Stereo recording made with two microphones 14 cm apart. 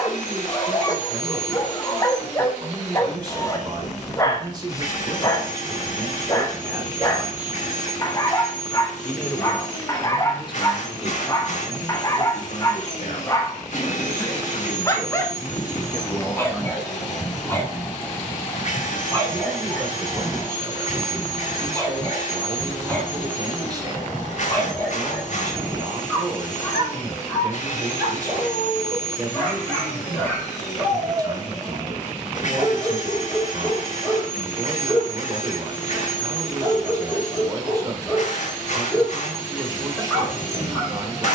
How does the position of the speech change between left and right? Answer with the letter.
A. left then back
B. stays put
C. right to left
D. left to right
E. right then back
A.